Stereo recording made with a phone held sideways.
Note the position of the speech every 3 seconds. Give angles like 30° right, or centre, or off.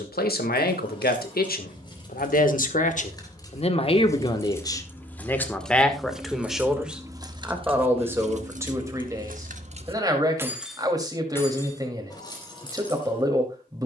70° left, 30° left, 10° right, 20° right, 20° right.